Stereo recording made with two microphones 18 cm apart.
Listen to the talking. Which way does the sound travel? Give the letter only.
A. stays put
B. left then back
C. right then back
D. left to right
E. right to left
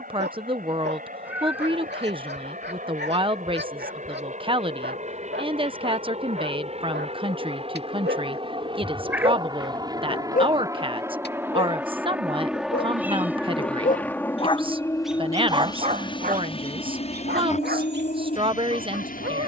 A.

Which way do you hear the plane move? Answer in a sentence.
You can hear the plane go from the right side to the left.